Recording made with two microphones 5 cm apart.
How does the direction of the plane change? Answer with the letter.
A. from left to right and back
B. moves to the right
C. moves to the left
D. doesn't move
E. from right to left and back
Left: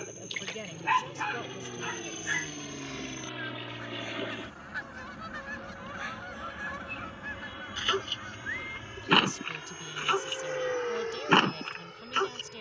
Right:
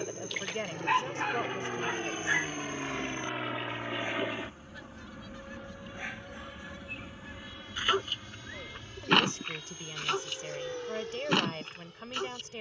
C.